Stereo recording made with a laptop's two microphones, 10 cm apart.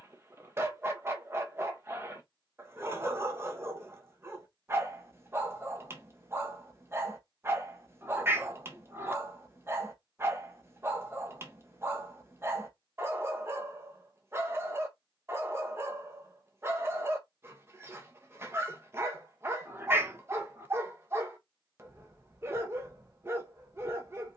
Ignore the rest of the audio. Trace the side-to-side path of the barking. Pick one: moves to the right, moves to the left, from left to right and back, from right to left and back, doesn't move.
doesn't move.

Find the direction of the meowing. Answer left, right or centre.
right.